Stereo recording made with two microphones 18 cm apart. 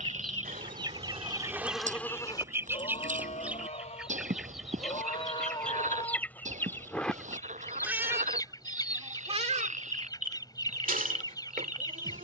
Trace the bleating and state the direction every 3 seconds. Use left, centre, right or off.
centre, left, centre, right.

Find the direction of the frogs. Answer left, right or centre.
right.